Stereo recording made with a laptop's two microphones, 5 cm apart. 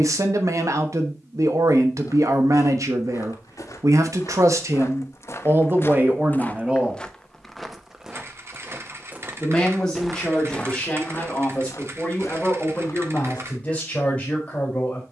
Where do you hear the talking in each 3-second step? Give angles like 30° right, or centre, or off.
60° right, 50° right, 20° right, 20° left, 20° left.